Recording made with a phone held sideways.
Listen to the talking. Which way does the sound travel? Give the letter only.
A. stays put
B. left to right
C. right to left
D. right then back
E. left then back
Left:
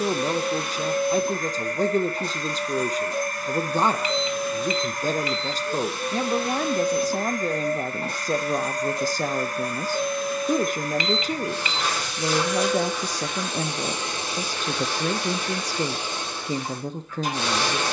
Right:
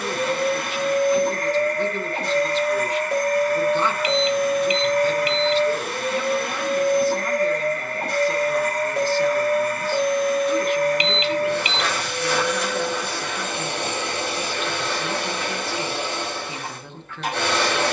A.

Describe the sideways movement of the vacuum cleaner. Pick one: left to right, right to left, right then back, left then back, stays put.
stays put.